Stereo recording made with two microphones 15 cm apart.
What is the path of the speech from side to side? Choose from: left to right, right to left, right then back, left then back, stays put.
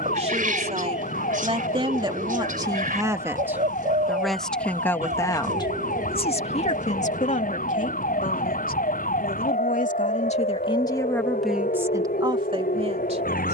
left then back.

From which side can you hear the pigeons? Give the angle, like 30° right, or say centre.
60° right.